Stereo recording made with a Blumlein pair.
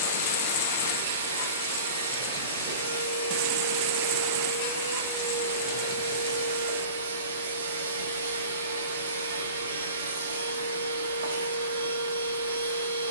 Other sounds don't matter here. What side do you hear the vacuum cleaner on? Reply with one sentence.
In this clip you hear the vacuum cleaner on the right.